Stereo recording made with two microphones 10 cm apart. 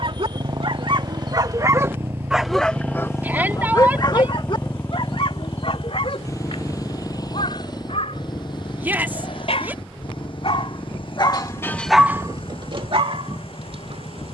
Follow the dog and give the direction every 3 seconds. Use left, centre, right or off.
right, left, left, left, right.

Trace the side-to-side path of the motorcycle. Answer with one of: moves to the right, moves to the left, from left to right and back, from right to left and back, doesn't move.
moves to the left.